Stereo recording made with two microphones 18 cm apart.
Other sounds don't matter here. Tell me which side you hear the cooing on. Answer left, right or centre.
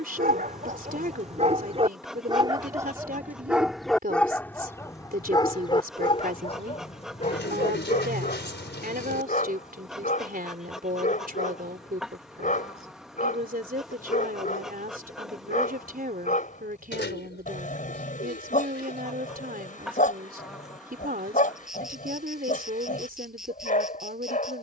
left.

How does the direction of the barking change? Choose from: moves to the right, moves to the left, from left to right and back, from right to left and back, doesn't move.
moves to the left.